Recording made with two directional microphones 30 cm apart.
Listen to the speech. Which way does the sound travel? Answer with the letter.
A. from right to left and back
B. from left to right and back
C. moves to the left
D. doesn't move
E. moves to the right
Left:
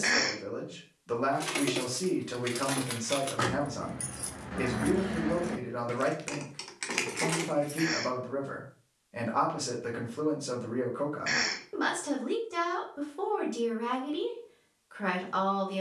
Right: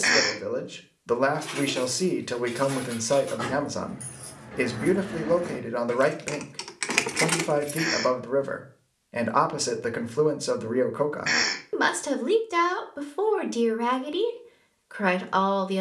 D.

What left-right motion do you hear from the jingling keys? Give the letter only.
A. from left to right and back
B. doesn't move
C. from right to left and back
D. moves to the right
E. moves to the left
D.